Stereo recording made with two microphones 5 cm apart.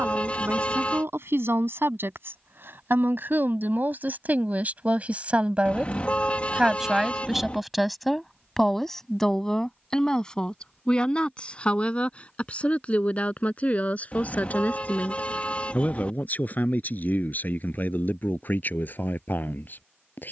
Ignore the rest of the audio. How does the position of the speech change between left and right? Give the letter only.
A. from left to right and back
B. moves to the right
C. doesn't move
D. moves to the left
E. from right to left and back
D.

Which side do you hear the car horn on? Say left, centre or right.
left.